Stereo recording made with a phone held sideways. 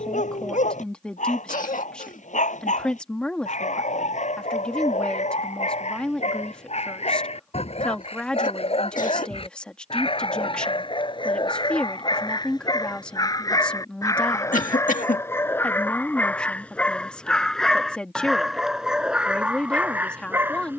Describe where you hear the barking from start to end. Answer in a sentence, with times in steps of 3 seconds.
In this clip you hear the barking on the left from 0 s and in the centre from 15 s.